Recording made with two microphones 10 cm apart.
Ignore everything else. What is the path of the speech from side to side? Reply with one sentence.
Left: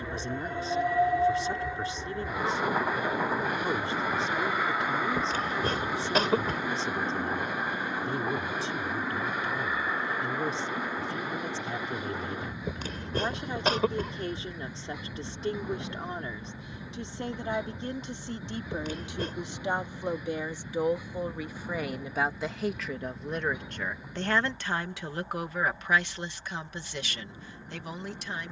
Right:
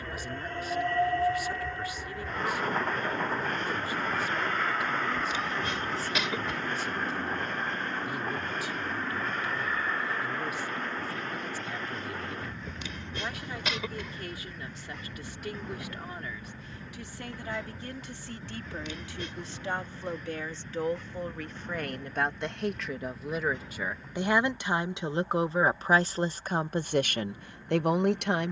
In this clip you hear the speech move to the right.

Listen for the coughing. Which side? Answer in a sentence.
In this clip you hear the coughing on the left.